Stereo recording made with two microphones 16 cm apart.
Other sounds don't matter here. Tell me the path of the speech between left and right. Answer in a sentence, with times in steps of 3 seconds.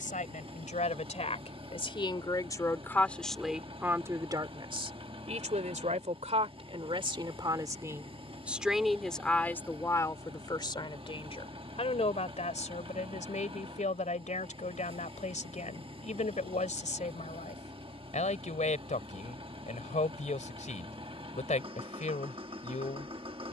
In this clip you hear the speech on the left from 0 s, on the right from 3 s and on the left from 9 s.